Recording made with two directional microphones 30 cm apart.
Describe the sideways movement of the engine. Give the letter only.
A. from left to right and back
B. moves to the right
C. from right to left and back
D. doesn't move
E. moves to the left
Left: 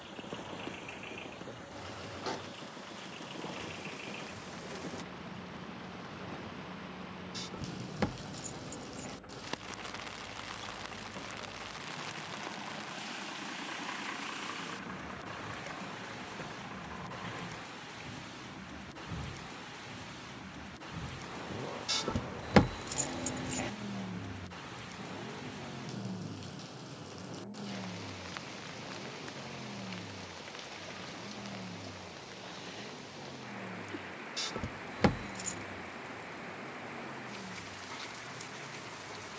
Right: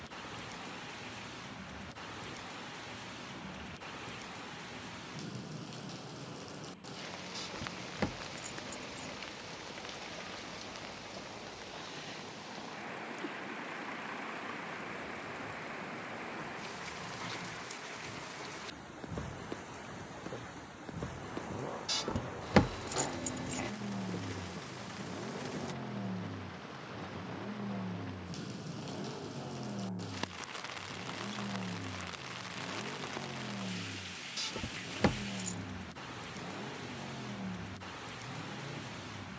B.